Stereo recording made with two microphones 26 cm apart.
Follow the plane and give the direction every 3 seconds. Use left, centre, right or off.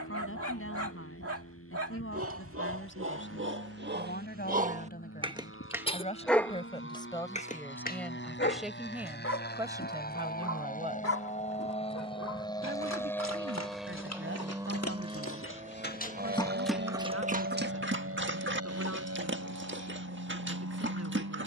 left, left, left, left, centre, right, right.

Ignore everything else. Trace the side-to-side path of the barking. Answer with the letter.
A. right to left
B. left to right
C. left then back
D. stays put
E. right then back
C.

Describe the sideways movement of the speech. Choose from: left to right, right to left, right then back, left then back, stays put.
left to right.